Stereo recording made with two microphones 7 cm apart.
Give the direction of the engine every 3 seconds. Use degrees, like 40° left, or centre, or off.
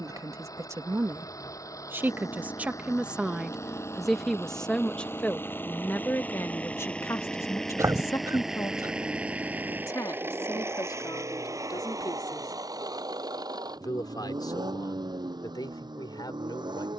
50° left, 30° left, 10° left, 30° right, 60° right, 70° right.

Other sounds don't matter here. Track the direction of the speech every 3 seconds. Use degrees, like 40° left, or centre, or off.
30° right, 10° left, 40° left, 60° left, 60° left, 70° left.